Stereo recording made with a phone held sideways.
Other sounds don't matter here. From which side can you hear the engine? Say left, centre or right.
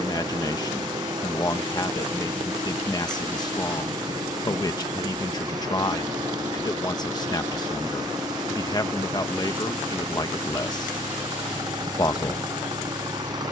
right.